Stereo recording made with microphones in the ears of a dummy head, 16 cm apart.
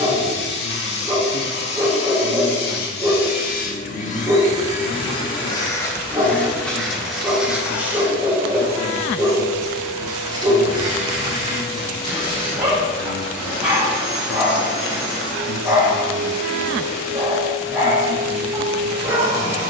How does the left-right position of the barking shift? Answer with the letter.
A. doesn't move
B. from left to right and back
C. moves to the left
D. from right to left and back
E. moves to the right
A.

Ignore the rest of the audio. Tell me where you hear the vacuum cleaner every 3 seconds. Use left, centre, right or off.
left, left, centre, right, right, right, right.